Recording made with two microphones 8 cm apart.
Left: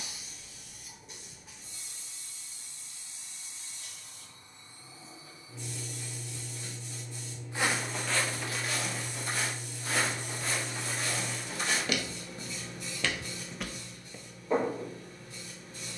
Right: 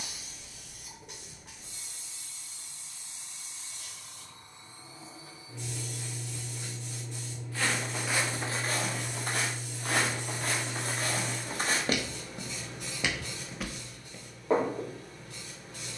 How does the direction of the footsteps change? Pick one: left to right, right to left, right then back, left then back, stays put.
right then back.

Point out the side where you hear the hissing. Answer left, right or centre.
right.